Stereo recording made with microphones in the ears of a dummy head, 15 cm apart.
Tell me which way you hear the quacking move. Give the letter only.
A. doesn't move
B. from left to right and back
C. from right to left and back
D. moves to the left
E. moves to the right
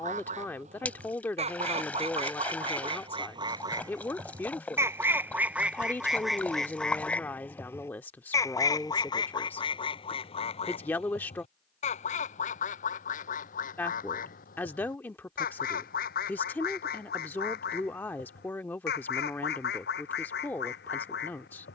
D.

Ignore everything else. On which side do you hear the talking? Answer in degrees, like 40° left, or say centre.
10° left.